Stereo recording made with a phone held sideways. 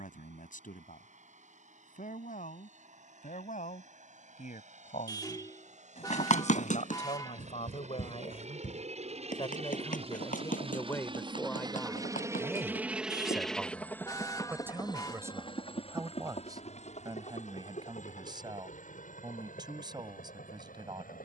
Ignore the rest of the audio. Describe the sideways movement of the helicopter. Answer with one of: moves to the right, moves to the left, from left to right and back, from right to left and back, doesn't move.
moves to the left.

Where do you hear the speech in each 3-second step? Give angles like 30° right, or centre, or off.
80° left, 70° left, 50° left, 20° left, 10° right, 30° right, 30° right.